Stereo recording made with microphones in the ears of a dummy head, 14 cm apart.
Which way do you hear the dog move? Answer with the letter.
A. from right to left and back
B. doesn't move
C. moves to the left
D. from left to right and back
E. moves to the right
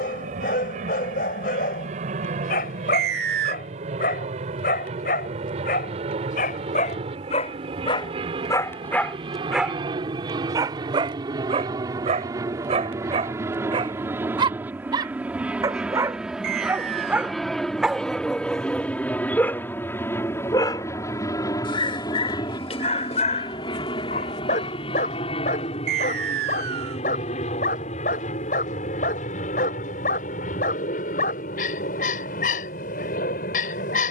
D.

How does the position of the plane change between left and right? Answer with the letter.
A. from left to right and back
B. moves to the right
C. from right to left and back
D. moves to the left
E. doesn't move
D.